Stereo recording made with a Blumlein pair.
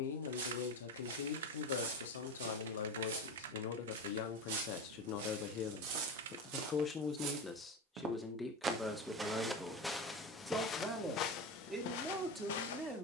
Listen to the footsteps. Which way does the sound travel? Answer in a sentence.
In this clip you hear the footsteps move from right to left.